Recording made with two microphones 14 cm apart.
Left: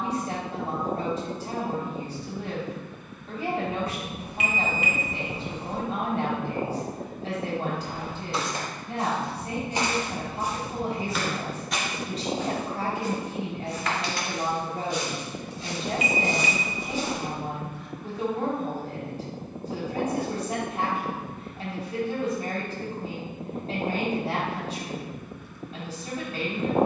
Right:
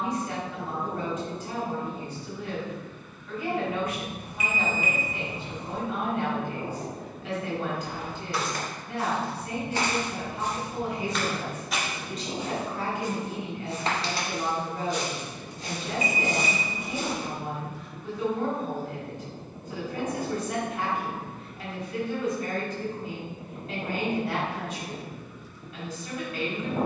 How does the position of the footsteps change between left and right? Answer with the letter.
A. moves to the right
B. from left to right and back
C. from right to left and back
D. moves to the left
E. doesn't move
A.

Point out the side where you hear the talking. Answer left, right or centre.
left.